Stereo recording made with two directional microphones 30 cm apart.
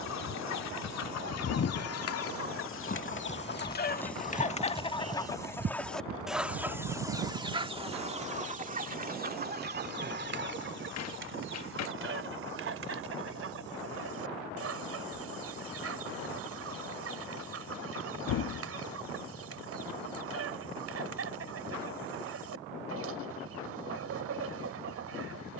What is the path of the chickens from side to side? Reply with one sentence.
You can hear the chickens move from left to right.